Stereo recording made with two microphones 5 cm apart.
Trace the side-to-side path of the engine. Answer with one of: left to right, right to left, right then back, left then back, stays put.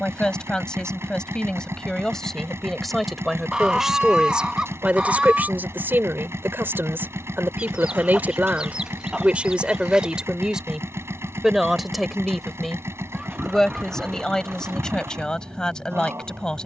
stays put.